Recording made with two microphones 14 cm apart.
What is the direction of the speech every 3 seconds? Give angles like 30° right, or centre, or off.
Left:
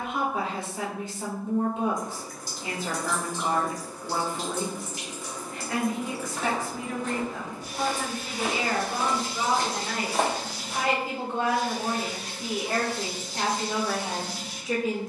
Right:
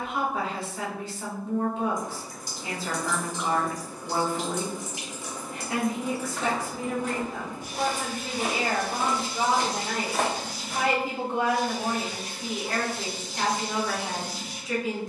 20° left, centre, 40° right, 30° right, 20° left.